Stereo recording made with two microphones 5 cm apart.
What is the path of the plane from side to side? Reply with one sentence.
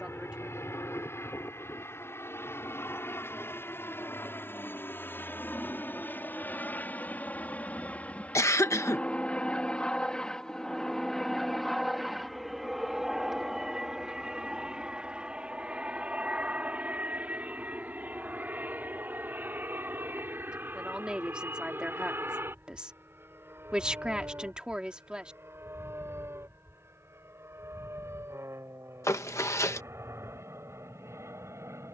In this clip you hear the plane move to the right.